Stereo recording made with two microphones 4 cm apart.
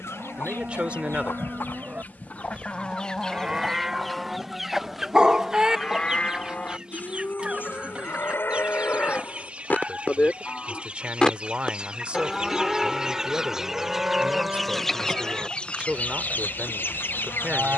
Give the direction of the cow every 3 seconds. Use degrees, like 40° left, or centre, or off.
30° right, centre, 40° left, 30° left, 10° right, 30° right.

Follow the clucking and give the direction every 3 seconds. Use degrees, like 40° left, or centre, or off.
50° left, centre, 20° right, 30° right, 10° right, 40° left.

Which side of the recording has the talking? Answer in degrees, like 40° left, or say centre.
30° right.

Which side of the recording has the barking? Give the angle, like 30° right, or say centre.
20° right.